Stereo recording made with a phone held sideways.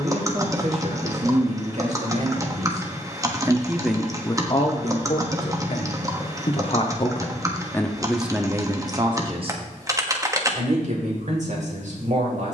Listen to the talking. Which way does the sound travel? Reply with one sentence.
You can hear the talking go left and come back.